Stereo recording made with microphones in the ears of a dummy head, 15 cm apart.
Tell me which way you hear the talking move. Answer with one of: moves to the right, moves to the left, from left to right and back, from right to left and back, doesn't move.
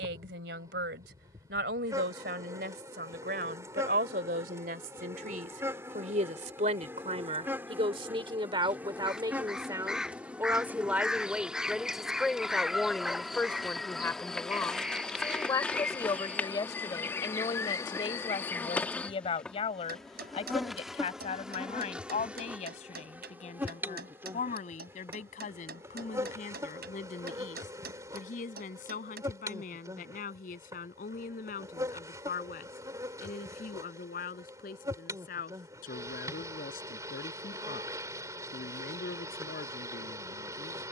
moves to the left.